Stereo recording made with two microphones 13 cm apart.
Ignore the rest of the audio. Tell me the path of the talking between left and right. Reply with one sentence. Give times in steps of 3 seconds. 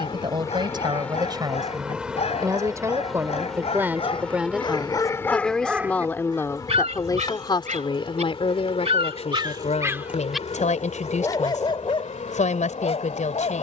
In this clip you hear the talking on the right from 0 s, in the centre from 3 s and on the left from 6 s.